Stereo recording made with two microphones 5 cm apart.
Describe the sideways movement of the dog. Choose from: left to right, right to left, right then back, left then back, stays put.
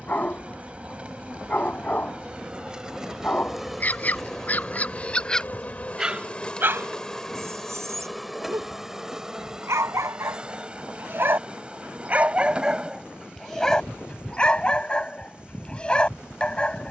right then back.